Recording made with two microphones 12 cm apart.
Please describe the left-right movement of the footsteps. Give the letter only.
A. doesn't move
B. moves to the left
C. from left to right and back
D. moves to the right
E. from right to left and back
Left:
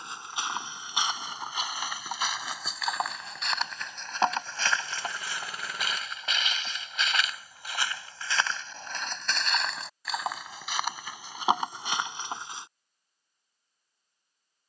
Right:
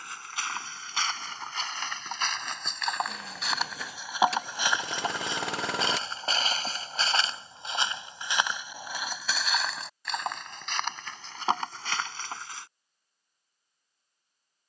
C.